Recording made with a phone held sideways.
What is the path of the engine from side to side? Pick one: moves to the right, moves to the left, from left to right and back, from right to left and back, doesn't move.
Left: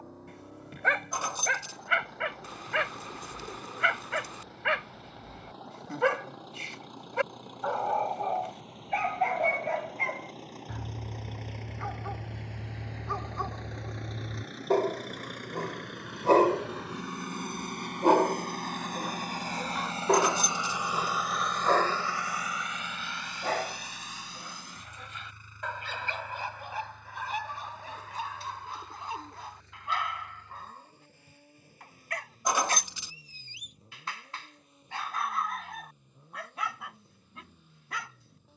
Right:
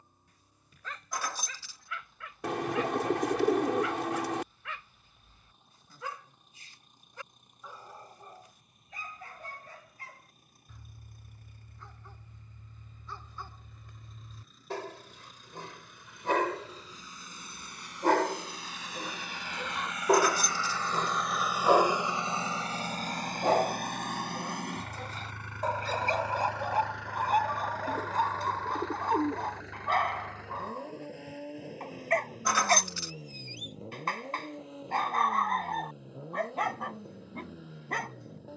moves to the right.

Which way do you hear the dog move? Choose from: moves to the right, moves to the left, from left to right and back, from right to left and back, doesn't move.
moves to the right.